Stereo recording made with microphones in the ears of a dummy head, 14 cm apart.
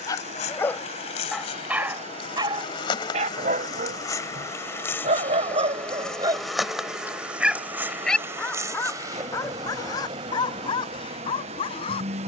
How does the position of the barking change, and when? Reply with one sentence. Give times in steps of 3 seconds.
You can hear the barking in the centre from 0 s, on the right from 3 s, in the centre from 6 s and on the left from 9 s.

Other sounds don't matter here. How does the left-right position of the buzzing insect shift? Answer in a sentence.
In this clip you hear the buzzing insect travel towards the right.